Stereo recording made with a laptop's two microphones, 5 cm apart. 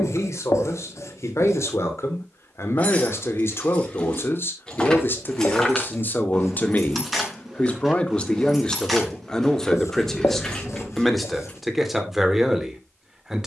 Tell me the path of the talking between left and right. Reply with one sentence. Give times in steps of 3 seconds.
You can hear the talking on the left from 0 s and in the centre from 9 s.